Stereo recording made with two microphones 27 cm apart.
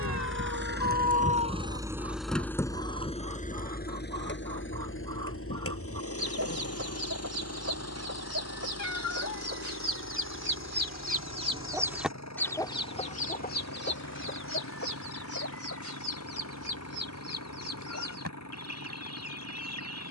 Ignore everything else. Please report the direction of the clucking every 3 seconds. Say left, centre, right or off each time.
right, right, right, right, left, left, left.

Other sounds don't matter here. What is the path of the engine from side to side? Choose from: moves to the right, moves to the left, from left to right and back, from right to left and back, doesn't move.
moves to the left.